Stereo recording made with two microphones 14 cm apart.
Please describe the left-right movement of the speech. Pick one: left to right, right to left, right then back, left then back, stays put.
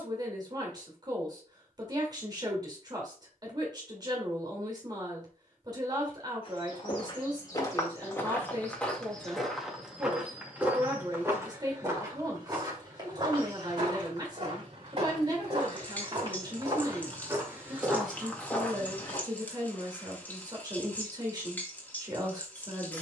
stays put.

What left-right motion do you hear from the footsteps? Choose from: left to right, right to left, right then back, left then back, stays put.
right then back.